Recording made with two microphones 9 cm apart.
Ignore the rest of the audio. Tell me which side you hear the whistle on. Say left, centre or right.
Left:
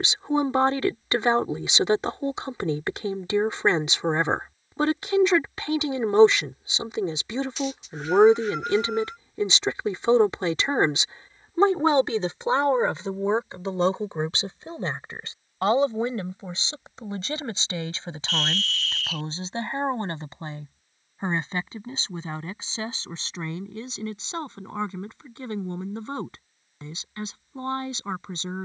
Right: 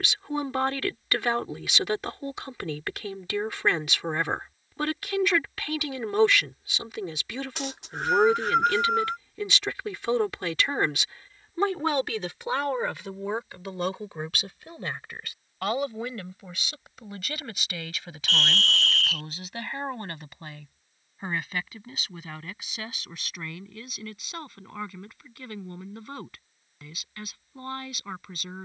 right.